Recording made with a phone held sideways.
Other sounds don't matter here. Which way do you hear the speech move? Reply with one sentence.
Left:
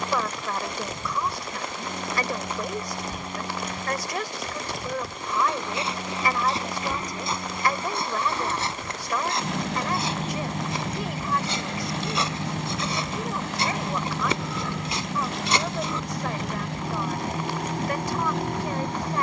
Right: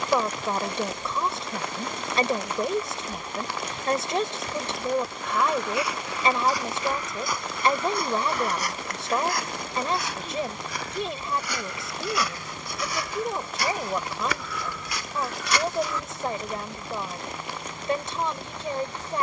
In this clip you hear the speech stay put.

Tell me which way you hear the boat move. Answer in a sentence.
You can hear the boat stay put.